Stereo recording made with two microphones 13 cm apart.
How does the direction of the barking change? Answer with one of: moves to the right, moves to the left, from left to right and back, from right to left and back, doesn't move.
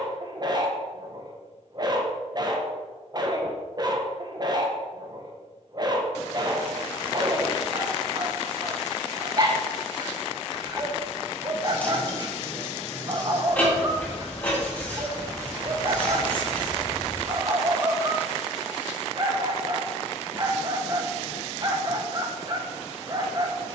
doesn't move.